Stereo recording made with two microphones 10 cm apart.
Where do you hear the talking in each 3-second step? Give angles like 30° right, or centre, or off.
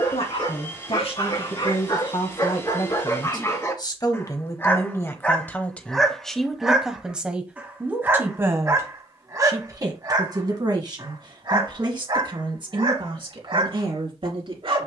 60° left, 30° left, 10° right, 40° right, 50° right.